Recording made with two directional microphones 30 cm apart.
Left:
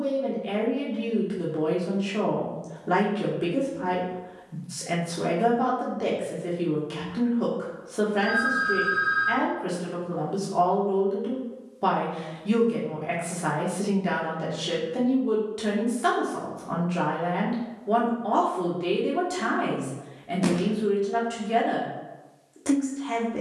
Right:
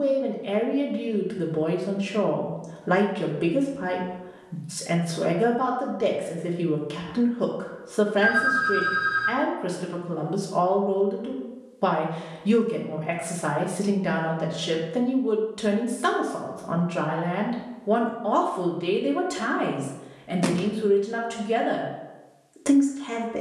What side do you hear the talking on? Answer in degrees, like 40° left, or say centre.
20° right.